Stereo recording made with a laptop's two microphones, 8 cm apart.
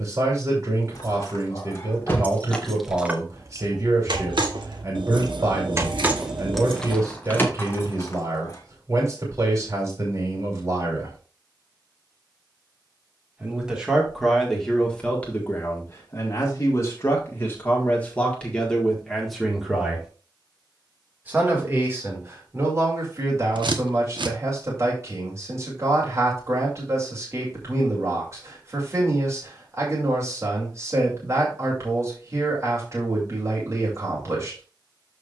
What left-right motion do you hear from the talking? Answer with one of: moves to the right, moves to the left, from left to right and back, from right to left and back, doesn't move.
from right to left and back.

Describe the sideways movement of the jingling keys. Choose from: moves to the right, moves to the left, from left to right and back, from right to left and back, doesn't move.
from left to right and back.